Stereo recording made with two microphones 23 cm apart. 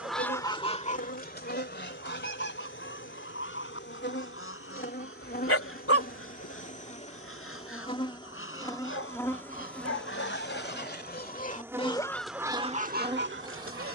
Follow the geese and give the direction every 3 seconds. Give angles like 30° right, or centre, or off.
40° left, 60° left, 70° left, 50° left, 40° right.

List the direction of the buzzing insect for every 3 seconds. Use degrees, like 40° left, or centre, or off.
60° left, 50° left, 30° left, centre, 20° right.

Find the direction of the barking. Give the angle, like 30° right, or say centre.
80° left.